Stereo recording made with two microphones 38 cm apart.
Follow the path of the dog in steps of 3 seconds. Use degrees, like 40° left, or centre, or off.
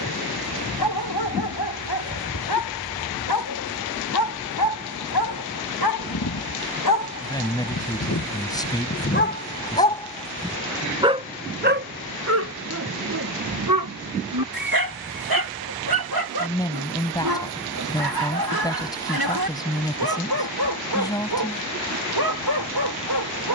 70° left, 70° left, 50° left, 10° left, 50° right, 70° right, 70° right, 70° right.